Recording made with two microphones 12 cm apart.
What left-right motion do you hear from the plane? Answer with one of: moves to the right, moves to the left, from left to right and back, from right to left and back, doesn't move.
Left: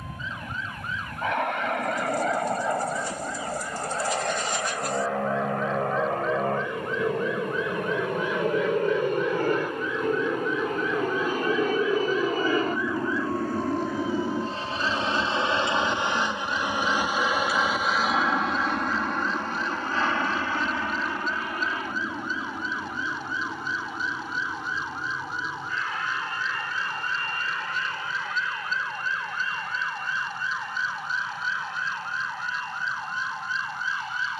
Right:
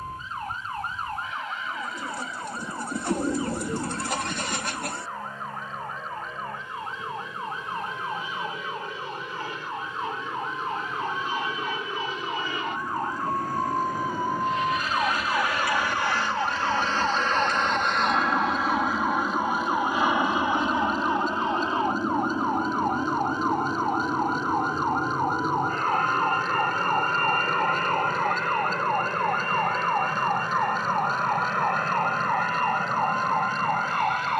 moves to the right.